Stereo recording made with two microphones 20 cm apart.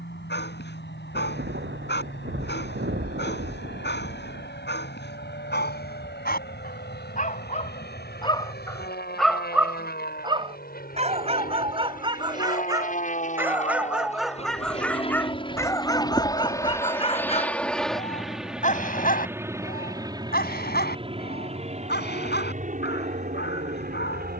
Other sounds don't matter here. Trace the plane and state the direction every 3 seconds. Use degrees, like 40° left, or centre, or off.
70° left, 70° left, 60° left, 50° left, 40° left, 20° left, 10° right, 40° right.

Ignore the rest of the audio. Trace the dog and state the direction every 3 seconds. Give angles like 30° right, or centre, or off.
60° left, 60° left, 30° left, 20° right, 10° right, 20° left, 50° left, 60° left.